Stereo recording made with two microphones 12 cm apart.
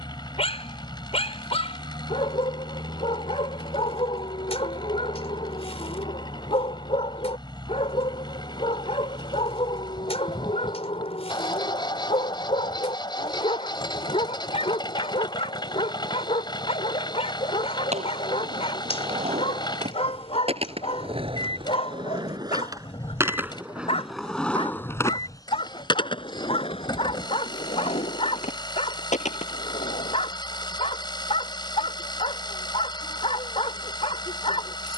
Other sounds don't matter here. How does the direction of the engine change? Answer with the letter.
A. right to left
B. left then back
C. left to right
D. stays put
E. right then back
D.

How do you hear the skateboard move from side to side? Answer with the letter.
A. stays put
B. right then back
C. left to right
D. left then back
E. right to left
E.